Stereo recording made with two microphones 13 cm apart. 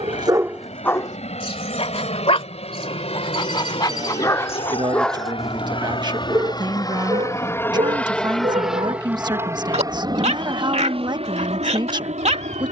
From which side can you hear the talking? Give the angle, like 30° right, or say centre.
30° right.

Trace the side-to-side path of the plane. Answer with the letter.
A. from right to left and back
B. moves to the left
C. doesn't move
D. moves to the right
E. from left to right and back
D.